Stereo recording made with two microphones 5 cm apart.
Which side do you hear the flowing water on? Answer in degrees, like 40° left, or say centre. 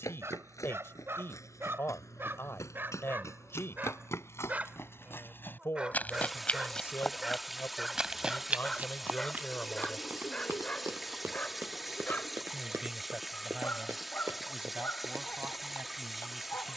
centre.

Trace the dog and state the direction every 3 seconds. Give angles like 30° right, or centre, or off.
50° right, 30° right, 10° right, 20° left, 40° left, 40° left.